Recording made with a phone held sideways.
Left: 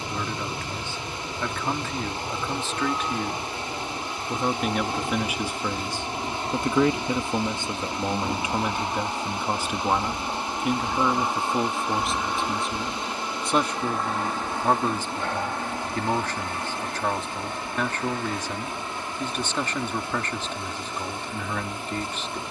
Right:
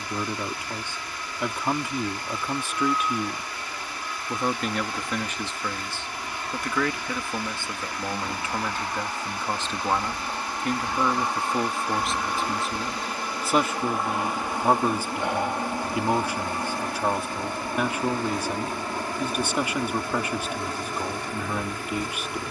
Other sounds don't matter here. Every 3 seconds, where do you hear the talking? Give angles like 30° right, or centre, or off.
10° right, centre, 20° left, 10° left, 10° right, 10° right, 10° right, 10° right.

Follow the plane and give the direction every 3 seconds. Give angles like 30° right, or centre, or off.
50° left, 40° left, 30° left, 10° left, centre, 20° right, 40° right, 40° right.